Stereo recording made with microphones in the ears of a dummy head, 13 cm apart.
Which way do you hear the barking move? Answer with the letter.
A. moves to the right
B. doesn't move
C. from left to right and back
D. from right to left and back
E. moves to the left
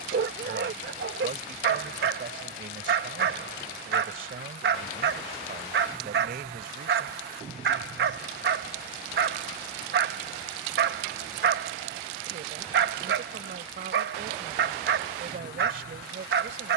B.